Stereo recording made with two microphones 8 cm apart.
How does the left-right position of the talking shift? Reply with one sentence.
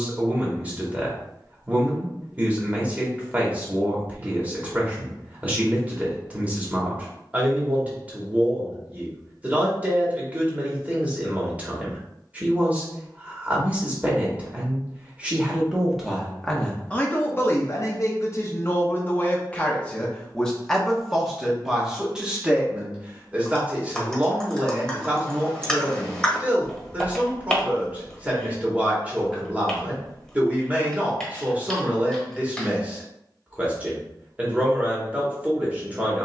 In this clip you hear the talking move from right to left and back again.